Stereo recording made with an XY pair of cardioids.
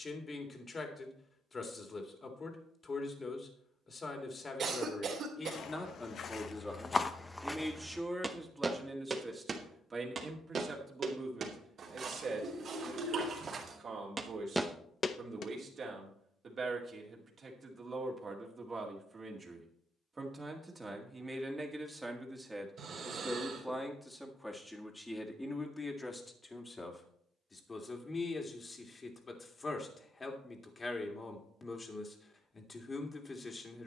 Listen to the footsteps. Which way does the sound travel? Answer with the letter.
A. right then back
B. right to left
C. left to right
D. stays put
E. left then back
A.